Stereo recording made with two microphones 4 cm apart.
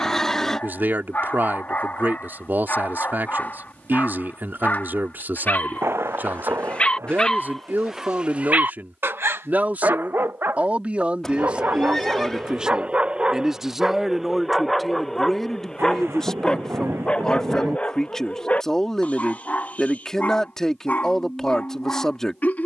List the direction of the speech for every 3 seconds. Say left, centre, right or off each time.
right, right, right, right, centre, centre, centre, centre.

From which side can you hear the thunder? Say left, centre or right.
right.